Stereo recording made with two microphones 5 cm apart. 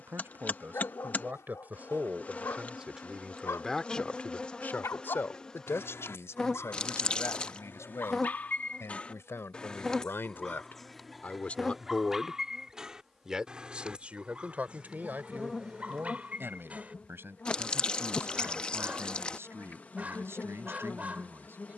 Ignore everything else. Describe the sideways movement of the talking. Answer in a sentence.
In this clip you hear the talking move from right to left and back again.